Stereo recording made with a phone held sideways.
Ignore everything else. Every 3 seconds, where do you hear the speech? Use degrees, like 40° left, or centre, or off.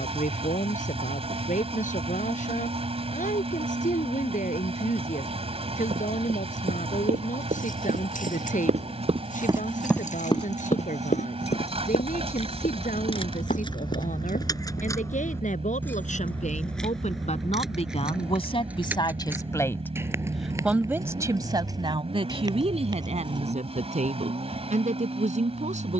70° left, 70° left, 70° left, 70° left, 70° left, 60° left, 30° left, 40° right, 60° right.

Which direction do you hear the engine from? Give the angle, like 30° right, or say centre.
50° right.